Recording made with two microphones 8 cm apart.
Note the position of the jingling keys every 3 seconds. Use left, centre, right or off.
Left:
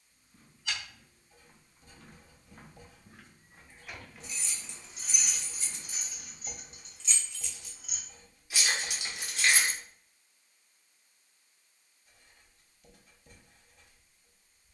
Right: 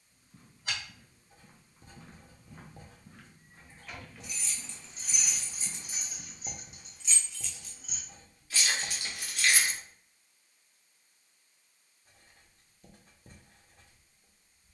off, centre, centre, left, off.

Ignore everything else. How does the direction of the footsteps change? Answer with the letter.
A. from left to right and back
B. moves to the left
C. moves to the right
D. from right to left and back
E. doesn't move
D.